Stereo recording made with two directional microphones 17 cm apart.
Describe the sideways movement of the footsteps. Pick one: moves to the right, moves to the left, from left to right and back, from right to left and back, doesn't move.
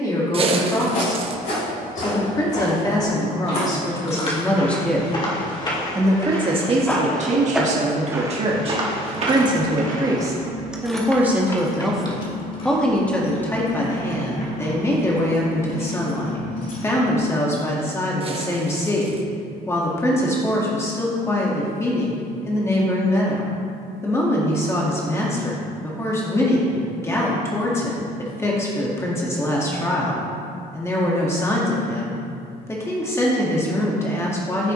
moves to the right.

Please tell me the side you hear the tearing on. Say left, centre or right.
right.